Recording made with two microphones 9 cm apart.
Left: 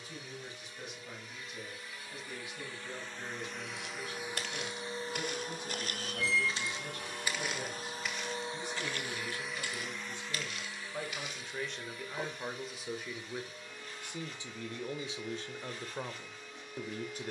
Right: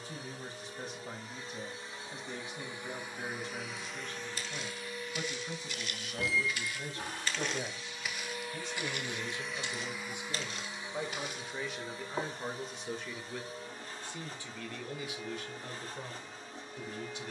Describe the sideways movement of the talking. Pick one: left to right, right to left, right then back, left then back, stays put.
right to left.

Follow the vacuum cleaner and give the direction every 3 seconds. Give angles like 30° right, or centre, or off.
30° right, 20° left, 40° left, 10° right, 40° right, 40° right.